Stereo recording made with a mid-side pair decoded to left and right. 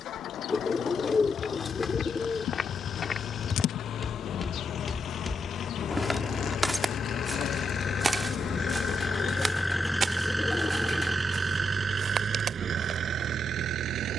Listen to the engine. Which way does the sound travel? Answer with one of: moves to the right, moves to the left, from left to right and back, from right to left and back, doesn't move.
moves to the right.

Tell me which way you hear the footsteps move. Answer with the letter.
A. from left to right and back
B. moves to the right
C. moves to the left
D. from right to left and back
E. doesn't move
B.